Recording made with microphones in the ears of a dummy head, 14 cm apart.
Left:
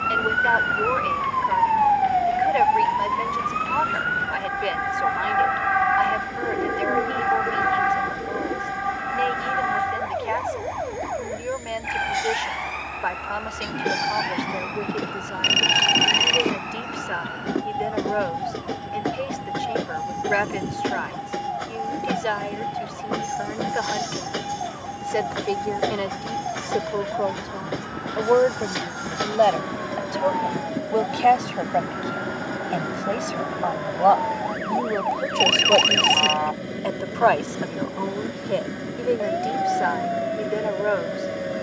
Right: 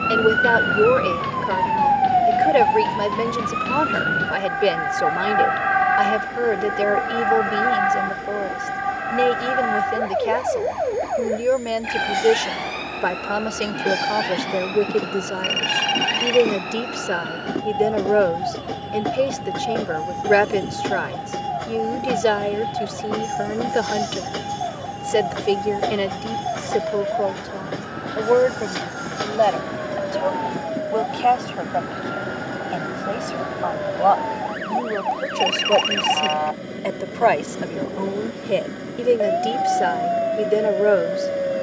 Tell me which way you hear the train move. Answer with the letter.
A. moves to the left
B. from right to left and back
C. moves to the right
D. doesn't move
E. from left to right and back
D.